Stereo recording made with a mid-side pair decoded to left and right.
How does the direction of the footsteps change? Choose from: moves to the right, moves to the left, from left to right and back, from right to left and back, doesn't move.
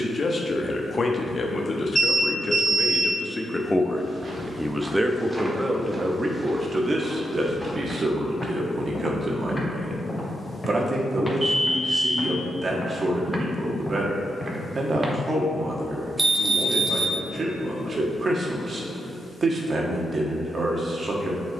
from right to left and back.